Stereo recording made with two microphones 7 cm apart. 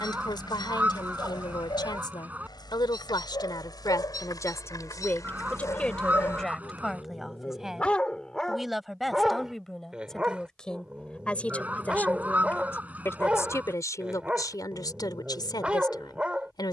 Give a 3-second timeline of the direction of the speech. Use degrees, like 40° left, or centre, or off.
80° left, 40° left, centre, 10° left, 40° left, 70° left.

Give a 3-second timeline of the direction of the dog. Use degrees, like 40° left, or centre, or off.
70° left, 60° left, 20° left, 10° right, 10° right, 10° right.